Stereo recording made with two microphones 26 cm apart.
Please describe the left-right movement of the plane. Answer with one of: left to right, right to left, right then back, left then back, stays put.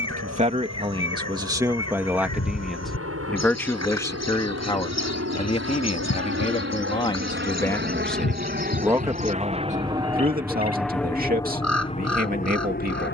right to left.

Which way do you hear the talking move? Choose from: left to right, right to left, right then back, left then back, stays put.
left then back.